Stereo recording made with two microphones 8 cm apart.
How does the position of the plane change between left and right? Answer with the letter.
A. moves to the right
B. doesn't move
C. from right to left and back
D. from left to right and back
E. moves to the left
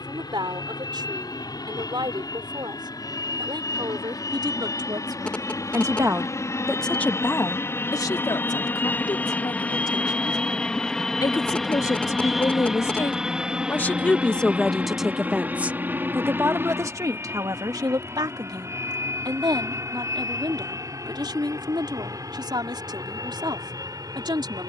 A.